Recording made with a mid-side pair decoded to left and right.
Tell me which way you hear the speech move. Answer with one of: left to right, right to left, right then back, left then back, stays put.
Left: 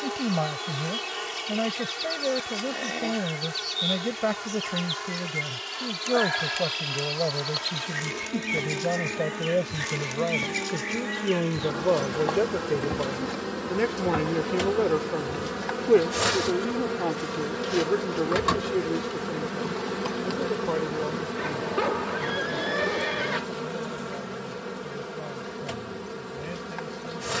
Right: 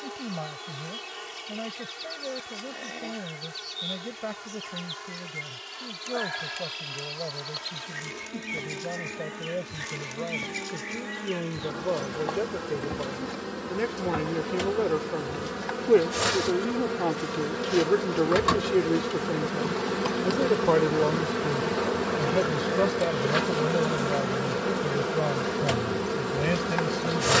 left to right.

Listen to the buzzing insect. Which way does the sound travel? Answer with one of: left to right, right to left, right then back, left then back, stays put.
left to right.